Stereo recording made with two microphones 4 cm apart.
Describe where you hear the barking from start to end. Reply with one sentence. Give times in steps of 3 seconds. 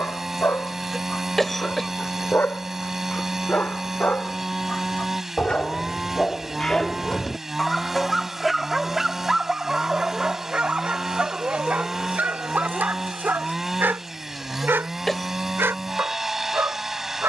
You can hear the barking on the left from 0 s, in the centre from 6 s and on the right from 9 s.